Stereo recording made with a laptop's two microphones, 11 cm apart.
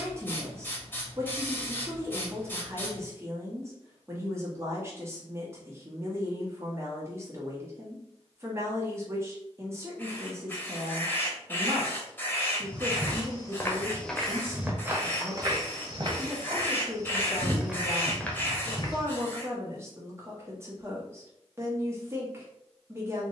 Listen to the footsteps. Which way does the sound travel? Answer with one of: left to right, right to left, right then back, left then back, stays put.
right then back.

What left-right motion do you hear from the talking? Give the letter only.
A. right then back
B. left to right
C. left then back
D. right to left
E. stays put
E.